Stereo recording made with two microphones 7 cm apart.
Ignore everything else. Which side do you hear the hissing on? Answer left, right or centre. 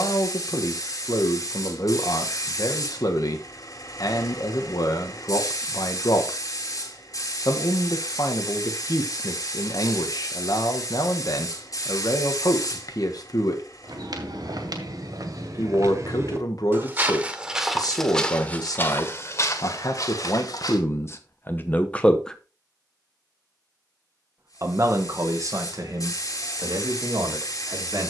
left.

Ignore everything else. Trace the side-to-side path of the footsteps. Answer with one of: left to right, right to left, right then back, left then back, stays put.
right to left.